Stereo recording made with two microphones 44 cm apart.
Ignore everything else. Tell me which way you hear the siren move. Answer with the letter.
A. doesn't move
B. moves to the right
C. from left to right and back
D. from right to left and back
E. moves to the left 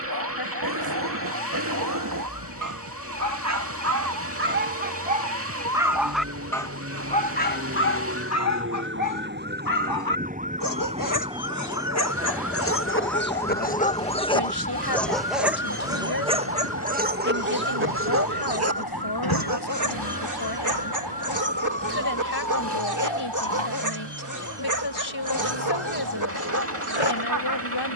E.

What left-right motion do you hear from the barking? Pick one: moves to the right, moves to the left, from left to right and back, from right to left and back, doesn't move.
from right to left and back.